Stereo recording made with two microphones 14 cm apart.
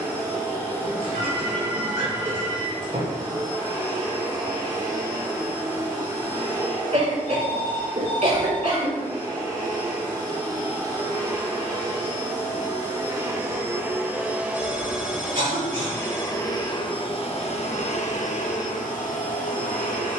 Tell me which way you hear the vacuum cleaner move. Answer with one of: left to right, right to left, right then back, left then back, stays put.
right to left.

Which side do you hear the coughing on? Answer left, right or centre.
right.